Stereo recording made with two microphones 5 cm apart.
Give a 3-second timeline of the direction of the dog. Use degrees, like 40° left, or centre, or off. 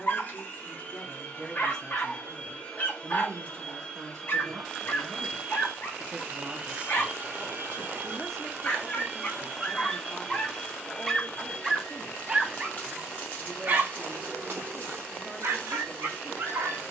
40° left, 40° left, 40° left, 20° left, 40° right, 60° right.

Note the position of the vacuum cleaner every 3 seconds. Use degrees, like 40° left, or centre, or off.
30° left, 10° left, 30° right, 10° left, 30° left, 30° left.